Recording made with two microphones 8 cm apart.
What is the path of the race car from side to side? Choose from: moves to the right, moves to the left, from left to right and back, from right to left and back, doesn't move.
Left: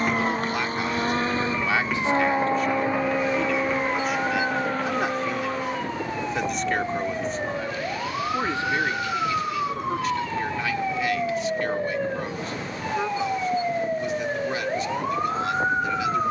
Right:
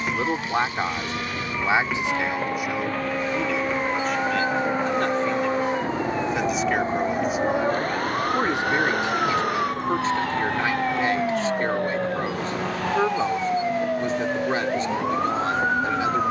moves to the right.